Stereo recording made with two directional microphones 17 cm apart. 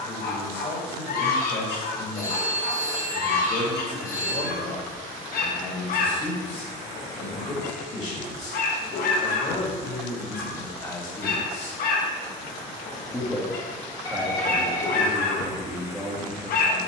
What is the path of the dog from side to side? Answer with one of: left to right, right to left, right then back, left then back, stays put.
stays put.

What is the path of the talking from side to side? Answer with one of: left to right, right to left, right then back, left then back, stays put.
left to right.